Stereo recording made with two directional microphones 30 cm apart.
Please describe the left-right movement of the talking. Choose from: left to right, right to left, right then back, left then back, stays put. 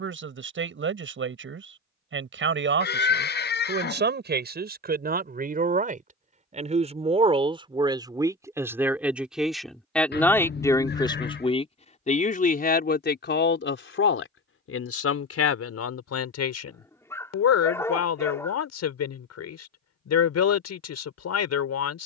right to left.